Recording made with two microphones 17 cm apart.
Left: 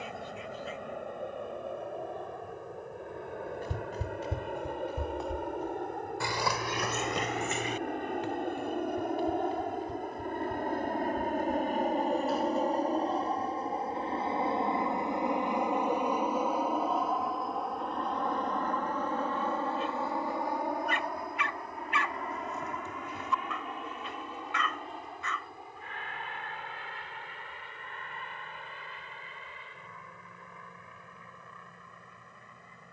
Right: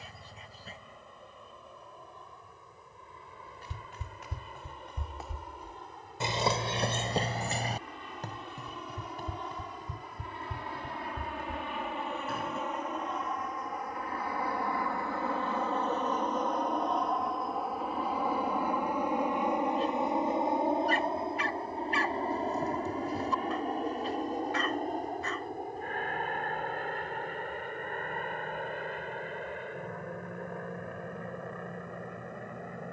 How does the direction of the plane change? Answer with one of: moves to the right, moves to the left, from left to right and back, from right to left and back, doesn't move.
moves to the right.